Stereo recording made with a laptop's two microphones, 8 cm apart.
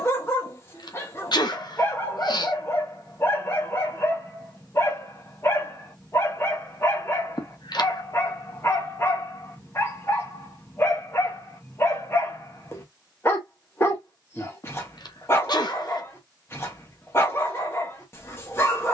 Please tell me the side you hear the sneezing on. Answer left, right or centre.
left.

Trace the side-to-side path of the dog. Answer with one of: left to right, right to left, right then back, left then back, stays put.
stays put.